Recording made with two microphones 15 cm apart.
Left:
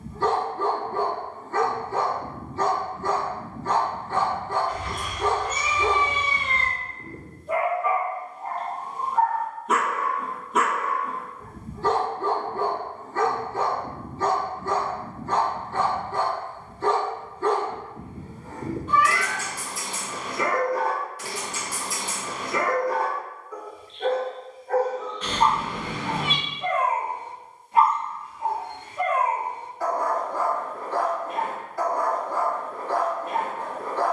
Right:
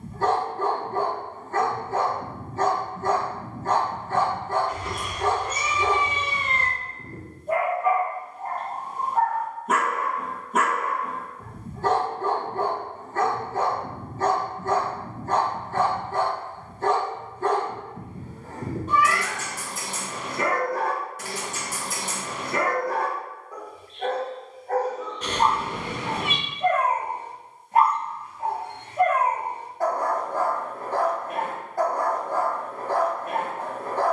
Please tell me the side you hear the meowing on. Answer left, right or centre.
right.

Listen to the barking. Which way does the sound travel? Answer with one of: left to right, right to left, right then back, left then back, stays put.
stays put.